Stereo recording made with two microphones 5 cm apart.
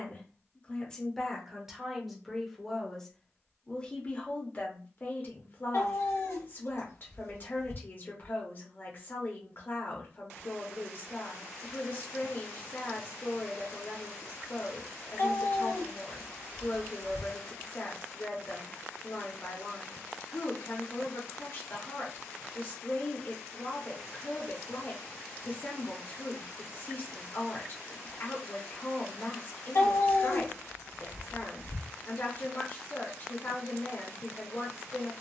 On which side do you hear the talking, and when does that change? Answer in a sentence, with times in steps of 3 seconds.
In this clip you hear the talking in the centre from 0 s and on the left from 3 s.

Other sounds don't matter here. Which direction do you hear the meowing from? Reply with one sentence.
In this clip you hear the meowing on the left.